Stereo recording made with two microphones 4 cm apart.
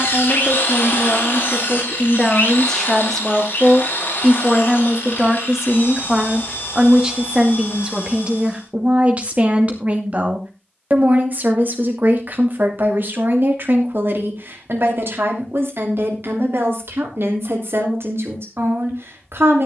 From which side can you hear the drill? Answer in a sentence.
In this clip you hear the drill on the left.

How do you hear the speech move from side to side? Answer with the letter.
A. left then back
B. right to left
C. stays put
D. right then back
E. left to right
E.